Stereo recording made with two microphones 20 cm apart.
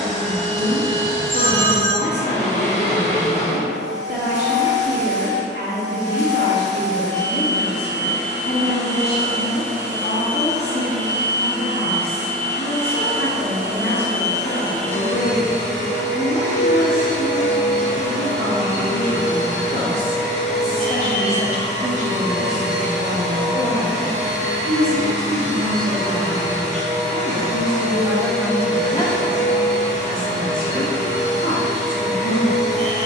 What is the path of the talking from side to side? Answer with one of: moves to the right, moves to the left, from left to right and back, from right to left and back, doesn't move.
from left to right and back.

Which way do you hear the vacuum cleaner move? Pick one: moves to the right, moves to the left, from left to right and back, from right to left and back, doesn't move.
doesn't move.